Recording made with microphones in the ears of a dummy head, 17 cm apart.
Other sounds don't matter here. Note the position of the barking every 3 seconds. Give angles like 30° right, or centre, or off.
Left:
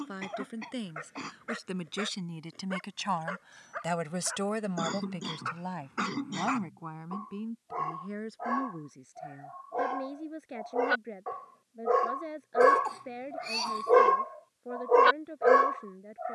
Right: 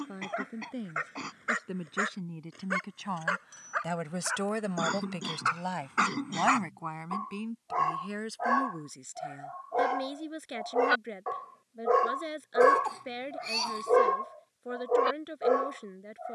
60° right, 50° right, 40° right, 30° right, 10° left, 50° left.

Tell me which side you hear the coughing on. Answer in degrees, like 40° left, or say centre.
10° right.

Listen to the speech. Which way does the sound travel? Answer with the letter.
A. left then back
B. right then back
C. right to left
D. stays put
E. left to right
E.